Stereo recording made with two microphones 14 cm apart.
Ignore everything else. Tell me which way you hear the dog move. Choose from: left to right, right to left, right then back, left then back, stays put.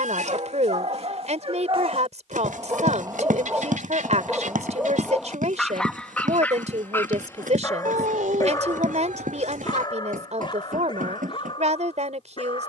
right to left.